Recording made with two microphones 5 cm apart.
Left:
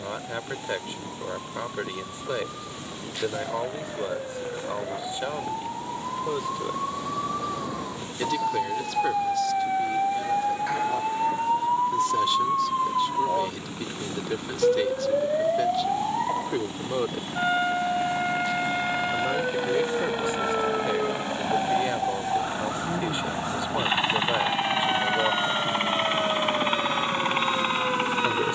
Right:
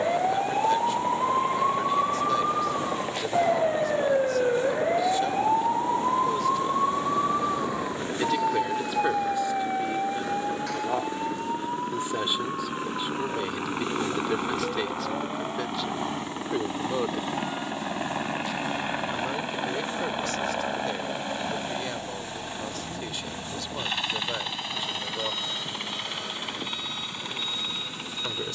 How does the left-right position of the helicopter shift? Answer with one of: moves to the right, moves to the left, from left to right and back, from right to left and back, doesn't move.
moves to the left.